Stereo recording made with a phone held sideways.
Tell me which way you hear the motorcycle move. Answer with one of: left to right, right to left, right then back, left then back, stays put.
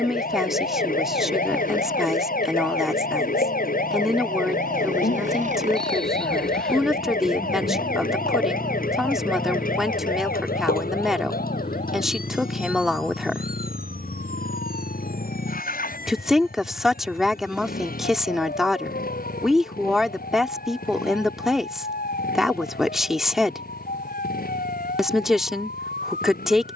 right to left.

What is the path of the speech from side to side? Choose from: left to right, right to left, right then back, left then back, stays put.
stays put.